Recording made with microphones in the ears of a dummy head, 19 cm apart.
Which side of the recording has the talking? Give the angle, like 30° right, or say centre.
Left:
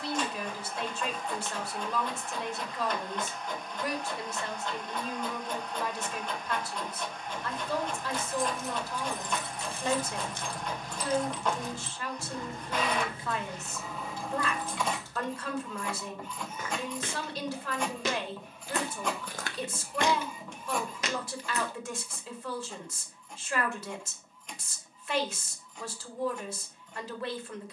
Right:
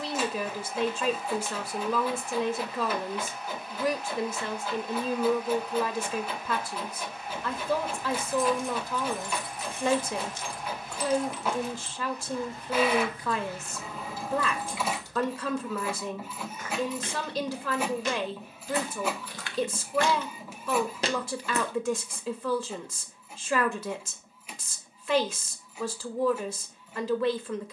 60° right.